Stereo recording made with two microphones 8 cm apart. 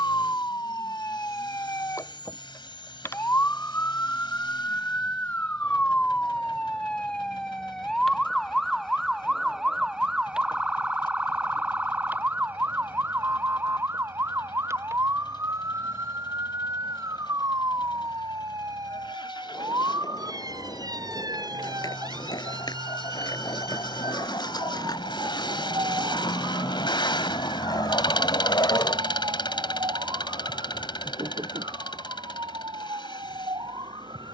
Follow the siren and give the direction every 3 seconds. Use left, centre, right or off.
left, left, centre, centre, right, right, right, right, right, right, right, right.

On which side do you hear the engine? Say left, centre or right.
left.